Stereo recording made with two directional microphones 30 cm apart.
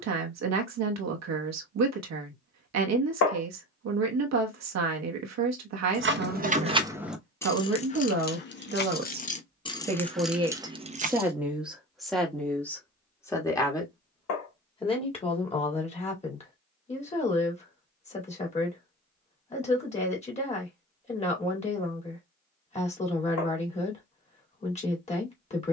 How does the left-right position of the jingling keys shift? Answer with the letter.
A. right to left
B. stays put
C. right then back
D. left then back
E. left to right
D.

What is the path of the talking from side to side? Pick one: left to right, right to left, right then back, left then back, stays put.
right to left.